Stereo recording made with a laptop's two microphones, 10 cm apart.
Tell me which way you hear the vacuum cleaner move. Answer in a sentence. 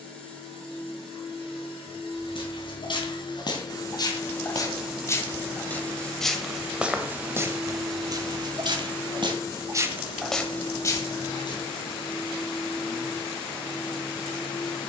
In this clip you hear the vacuum cleaner go right and come back.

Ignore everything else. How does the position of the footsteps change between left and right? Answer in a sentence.
You can hear the footsteps move from left to right and back again.